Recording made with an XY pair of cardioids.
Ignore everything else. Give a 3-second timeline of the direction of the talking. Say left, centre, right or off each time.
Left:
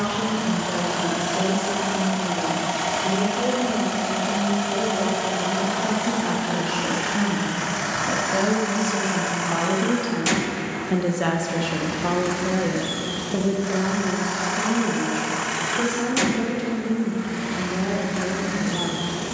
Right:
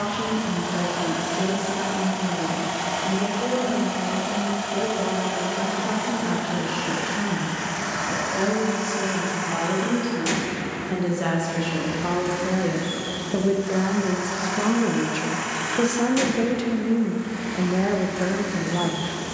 left, left, left, left, centre, right, right.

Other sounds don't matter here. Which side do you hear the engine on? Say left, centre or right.
left.